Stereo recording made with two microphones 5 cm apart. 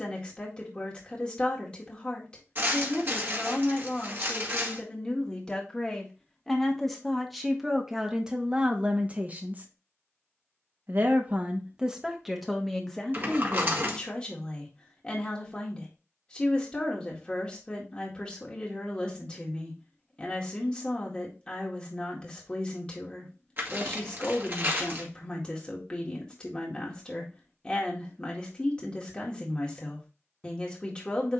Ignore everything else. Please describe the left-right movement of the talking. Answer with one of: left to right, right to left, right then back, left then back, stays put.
right then back.